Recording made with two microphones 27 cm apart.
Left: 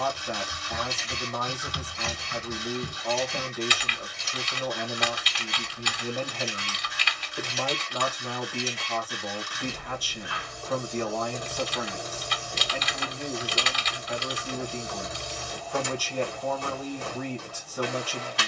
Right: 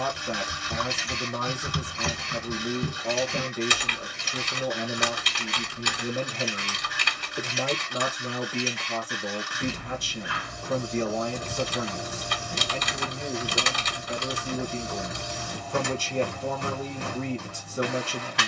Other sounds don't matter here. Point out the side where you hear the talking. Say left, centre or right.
right.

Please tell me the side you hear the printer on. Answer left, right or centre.
right.